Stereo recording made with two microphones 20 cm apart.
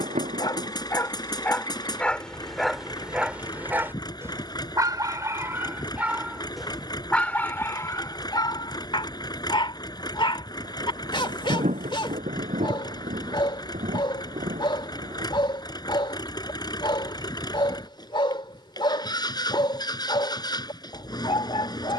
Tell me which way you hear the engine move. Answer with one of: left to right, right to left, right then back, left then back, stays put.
stays put.